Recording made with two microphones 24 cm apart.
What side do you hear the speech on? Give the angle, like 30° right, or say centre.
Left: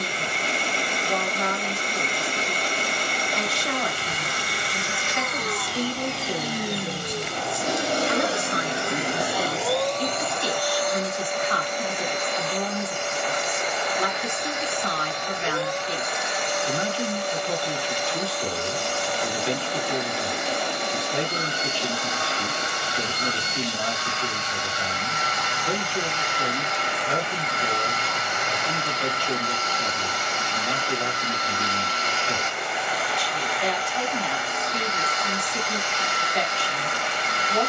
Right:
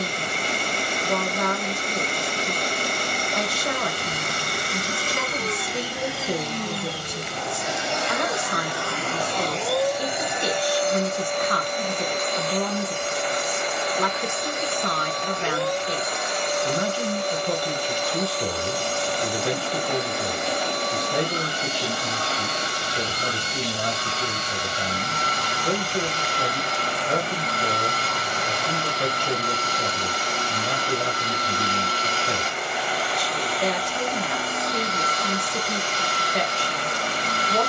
50° right.